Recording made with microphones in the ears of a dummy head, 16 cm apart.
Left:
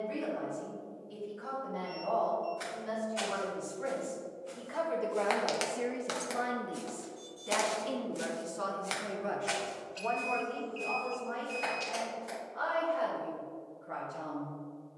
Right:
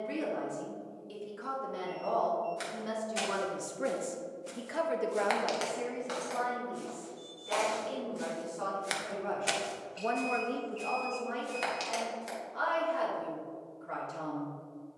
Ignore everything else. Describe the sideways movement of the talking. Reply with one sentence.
You can hear the talking move from right to left and back again.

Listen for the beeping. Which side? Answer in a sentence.
In this clip you hear the beeping on the left.